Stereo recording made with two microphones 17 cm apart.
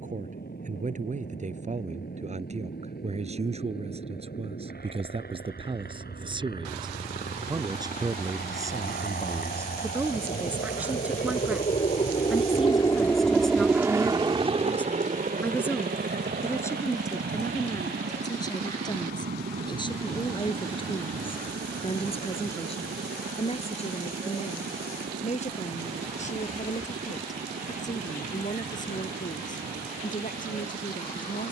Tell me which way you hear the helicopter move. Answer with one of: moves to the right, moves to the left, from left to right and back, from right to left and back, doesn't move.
moves to the right.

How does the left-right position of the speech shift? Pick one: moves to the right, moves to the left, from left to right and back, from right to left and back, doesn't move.
moves to the left.